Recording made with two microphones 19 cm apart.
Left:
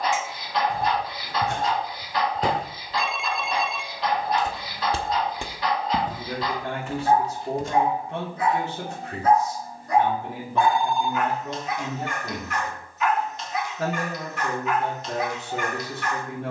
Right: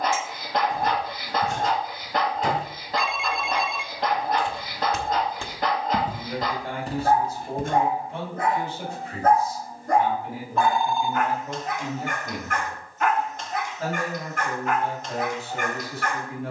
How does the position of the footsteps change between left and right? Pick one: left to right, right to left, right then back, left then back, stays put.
left to right.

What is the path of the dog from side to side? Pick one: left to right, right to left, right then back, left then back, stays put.
stays put.